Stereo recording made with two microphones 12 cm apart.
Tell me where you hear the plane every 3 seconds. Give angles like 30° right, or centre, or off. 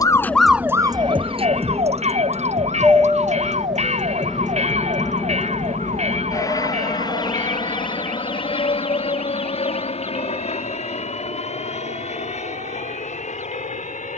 30° right, 10° left, 40° left, 60° left, 60° left.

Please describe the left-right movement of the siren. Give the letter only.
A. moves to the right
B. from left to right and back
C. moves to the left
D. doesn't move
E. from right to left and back
A.